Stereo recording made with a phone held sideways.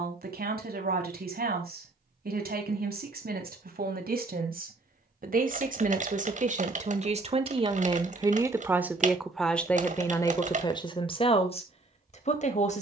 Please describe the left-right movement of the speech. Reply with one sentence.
In this clip you hear the speech go from the right side to the left.